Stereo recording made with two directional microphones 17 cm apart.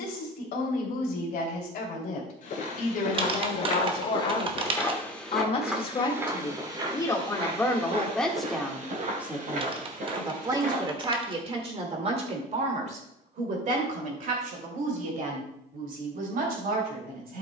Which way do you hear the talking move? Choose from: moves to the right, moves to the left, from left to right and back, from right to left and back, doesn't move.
moves to the right.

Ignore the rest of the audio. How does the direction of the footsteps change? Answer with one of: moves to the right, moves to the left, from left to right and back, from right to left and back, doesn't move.
moves to the right.